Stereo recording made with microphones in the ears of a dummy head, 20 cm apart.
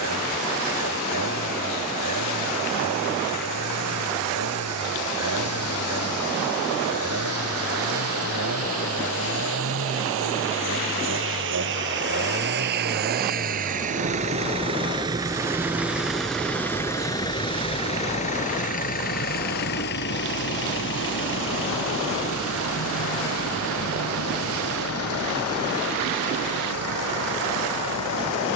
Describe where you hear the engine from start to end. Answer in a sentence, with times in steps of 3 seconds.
You can hear the engine on the right from 0 s, in the centre from 15 s and on the left from 18 s.